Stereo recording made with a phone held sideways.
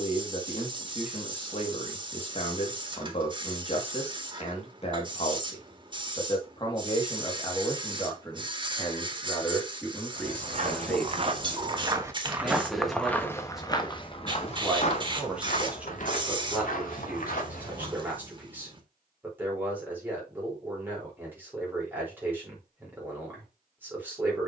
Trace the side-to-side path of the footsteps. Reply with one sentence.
In this clip you hear the footsteps travel towards the left.